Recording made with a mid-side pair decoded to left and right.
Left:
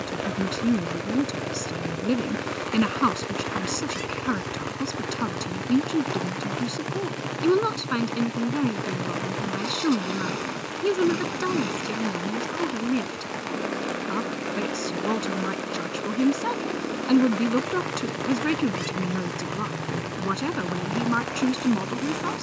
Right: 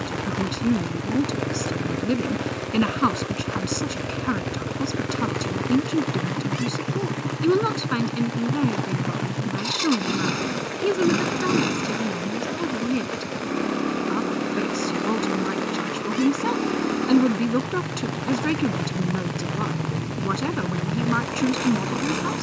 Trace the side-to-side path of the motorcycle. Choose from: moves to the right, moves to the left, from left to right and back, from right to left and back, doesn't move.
doesn't move.